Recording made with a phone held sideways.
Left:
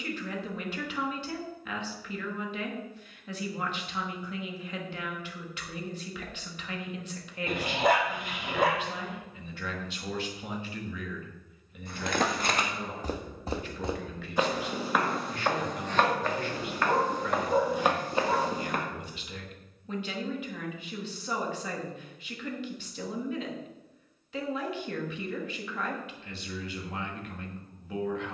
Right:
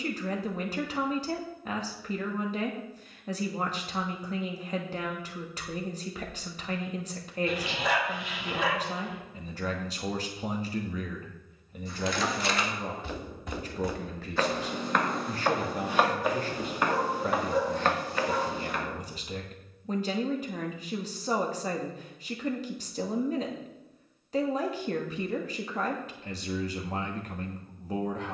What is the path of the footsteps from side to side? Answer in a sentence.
In this clip you hear the footsteps move from left to right and back again.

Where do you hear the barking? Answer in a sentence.
In this clip you hear the barking on the left.